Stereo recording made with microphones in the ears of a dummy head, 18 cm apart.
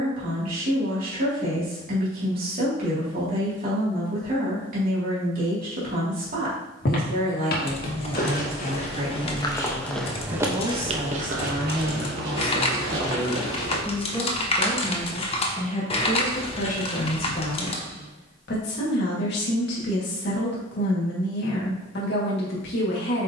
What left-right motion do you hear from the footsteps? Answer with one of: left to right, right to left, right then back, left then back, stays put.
left to right.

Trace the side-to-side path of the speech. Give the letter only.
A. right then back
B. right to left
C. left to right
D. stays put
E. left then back
B.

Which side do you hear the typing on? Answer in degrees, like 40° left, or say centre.
30° left.